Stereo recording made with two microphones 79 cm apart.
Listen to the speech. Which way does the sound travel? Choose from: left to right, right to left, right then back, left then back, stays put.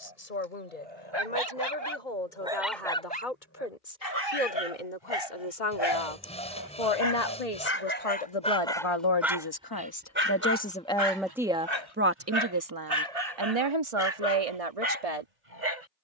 left to right.